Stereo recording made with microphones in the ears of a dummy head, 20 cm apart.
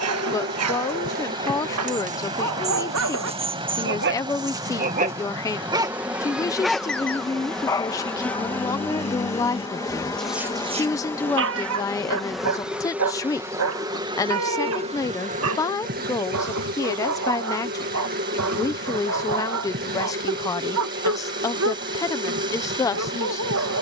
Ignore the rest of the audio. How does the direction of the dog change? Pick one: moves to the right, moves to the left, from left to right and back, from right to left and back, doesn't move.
from right to left and back.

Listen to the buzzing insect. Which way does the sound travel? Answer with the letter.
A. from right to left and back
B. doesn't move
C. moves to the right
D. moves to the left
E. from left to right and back
A.